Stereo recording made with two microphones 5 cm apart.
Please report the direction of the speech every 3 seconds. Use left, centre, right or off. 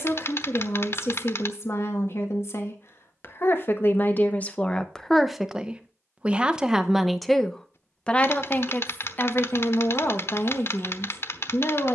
left, left, centre, left.